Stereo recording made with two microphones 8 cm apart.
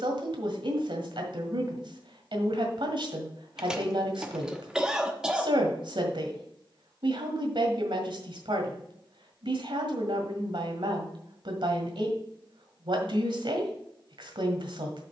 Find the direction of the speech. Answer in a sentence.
You can hear the speech on the right.